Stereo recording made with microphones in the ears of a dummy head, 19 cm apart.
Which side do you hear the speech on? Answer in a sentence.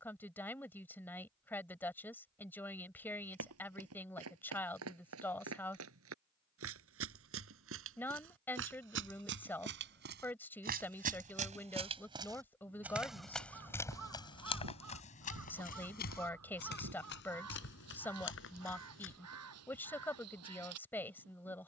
In this clip you hear the speech in the centre.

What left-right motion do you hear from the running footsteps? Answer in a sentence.
You can hear the running footsteps move to the left.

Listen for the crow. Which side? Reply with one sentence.
In this clip you hear the crow on the right.